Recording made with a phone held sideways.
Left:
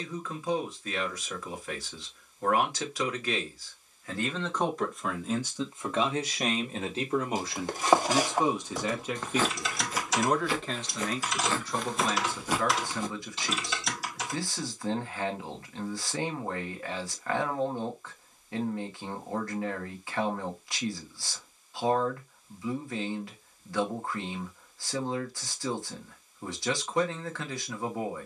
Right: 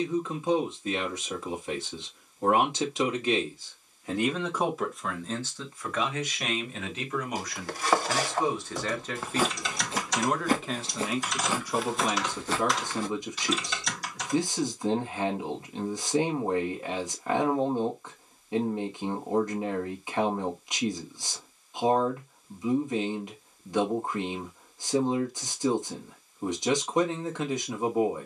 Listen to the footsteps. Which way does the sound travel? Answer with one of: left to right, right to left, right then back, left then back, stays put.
right then back.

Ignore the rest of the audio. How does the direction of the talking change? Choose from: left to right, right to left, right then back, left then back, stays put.
left then back.